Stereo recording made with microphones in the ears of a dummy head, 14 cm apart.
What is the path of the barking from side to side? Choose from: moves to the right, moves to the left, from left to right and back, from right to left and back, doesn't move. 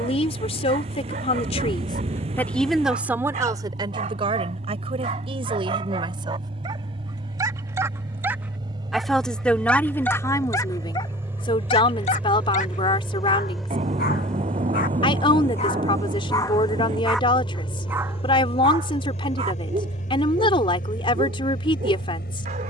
from right to left and back.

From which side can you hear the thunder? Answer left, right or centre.
right.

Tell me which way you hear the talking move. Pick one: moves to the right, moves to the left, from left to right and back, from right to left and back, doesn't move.
from left to right and back.